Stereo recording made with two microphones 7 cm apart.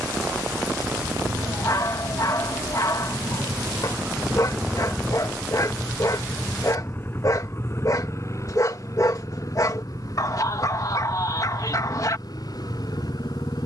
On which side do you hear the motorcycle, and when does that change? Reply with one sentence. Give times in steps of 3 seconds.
You can hear the motorcycle on the right from 0 s, in the centre from 3 s and on the left from 6 s.